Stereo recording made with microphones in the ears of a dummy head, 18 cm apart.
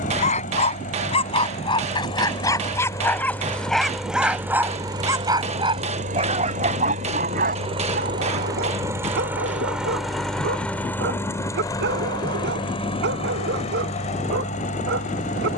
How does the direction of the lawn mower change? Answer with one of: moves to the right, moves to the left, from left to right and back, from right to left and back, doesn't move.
from left to right and back.